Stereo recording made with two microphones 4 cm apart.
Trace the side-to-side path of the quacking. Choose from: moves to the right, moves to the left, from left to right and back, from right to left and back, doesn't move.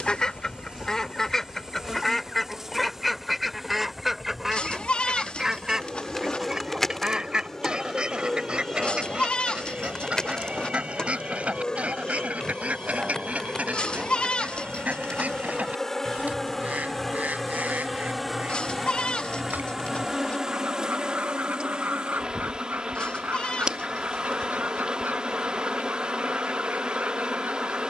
moves to the right.